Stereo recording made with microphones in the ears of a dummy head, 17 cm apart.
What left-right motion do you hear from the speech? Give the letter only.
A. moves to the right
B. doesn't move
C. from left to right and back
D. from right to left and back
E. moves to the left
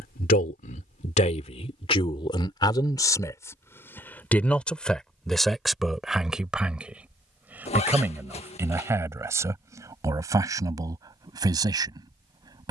A.